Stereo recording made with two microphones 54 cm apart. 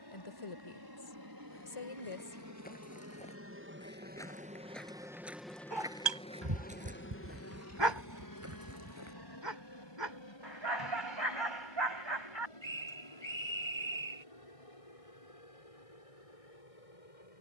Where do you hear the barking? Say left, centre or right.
right.